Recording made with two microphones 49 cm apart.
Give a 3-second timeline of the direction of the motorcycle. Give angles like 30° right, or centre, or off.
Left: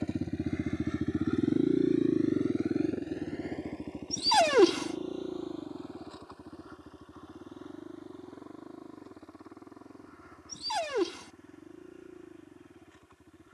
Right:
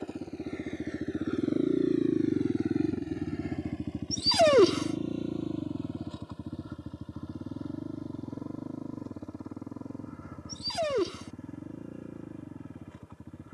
10° left, 40° right, 60° right, 60° right, 70° right.